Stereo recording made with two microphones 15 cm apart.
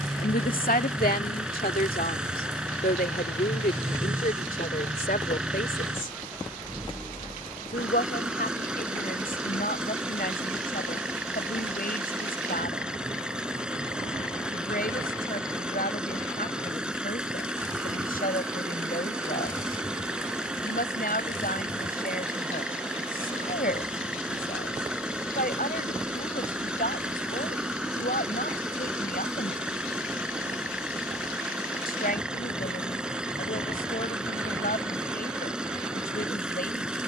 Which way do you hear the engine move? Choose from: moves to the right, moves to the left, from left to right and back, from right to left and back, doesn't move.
doesn't move.